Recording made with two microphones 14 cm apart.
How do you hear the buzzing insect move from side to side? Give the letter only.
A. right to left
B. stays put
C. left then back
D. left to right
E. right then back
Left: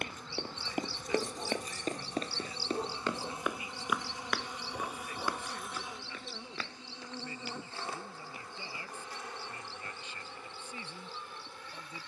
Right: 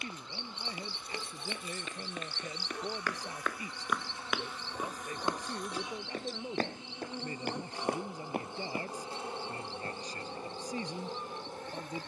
D.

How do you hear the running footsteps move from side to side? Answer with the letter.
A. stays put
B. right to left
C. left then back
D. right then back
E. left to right
E.